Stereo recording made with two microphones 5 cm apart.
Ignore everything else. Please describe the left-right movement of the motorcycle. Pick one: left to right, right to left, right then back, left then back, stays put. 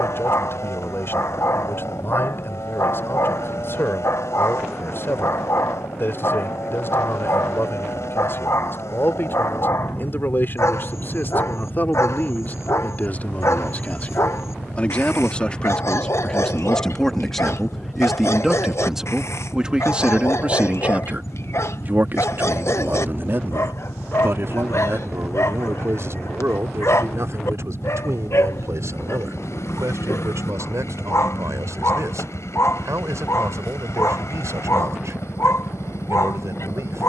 stays put.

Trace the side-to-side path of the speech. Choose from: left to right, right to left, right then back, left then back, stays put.
left to right.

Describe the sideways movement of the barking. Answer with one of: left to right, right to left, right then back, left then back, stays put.
stays put.